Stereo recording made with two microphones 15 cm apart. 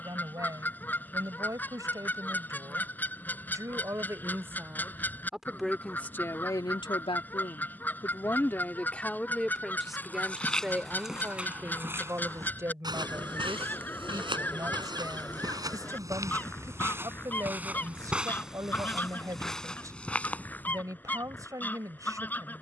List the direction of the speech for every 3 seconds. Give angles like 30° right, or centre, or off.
20° right, 10° right, 20° left, 10° right, 20° right, 20° right, 20° right, 20° right.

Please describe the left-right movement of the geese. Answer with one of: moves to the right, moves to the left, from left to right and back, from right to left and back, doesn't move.
doesn't move.